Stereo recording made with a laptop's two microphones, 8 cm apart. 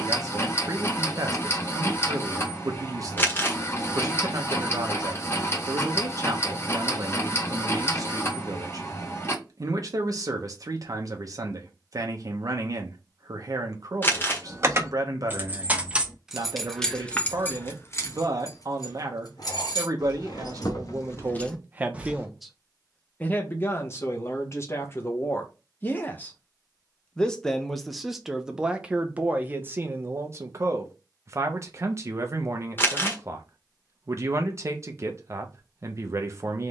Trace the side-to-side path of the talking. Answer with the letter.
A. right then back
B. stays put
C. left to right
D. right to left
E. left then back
E.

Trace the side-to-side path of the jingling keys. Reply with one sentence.
In this clip you hear the jingling keys go left and come back.